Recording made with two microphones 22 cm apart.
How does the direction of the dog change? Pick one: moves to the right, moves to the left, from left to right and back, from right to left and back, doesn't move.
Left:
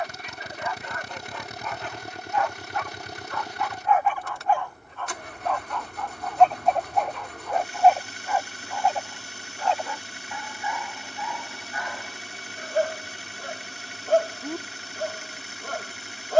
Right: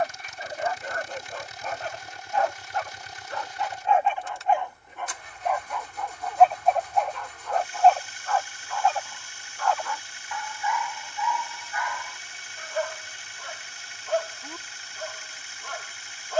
moves to the left.